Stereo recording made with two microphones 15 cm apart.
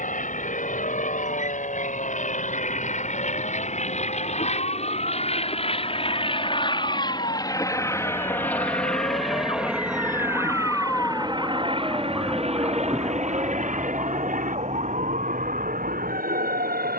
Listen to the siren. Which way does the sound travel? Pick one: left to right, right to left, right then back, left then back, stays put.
left to right.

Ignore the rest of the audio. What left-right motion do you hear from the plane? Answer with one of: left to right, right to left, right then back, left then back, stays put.
left to right.